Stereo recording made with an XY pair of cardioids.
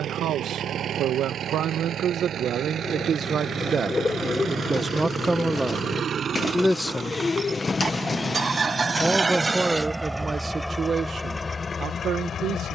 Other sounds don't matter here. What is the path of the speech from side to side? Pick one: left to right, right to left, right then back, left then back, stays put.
left then back.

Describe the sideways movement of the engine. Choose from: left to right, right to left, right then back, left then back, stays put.
right to left.